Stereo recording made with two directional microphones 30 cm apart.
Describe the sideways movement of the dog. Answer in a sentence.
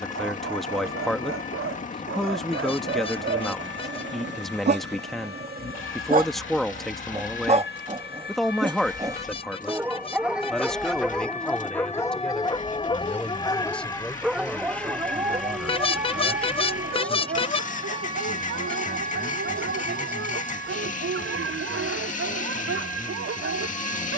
You can hear the dog go left and come back.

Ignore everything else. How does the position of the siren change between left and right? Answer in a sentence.
You can hear the siren move to the right.